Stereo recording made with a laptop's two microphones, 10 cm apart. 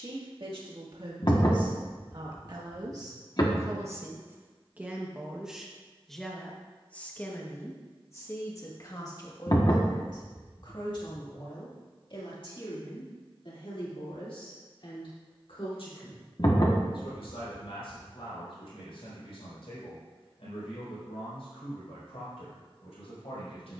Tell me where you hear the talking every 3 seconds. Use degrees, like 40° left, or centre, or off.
50° right, 20° right, 20° left, 40° left, 60° left, 60° left, 70° left, 70° left.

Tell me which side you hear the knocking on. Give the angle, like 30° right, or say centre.
40° left.